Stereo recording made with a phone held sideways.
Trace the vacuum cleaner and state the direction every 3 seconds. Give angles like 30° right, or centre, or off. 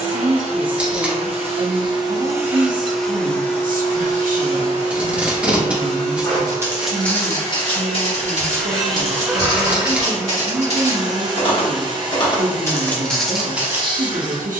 30° right, 30° left, 20° left, 20° right, 30° right.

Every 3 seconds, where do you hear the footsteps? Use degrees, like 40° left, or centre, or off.
off, off, 30° left, 50° left, 10° left.